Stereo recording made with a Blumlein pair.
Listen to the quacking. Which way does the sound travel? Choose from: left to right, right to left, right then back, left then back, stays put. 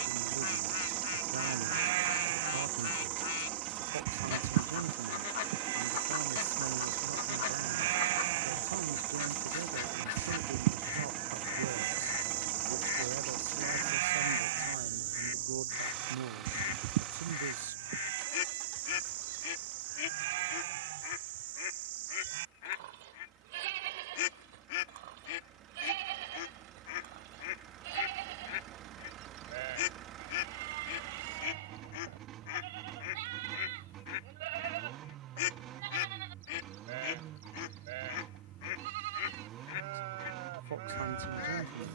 stays put.